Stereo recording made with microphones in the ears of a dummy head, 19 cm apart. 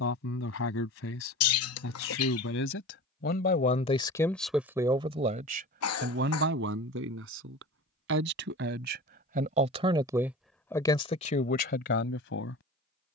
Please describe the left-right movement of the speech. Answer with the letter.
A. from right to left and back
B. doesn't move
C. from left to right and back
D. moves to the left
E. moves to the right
C.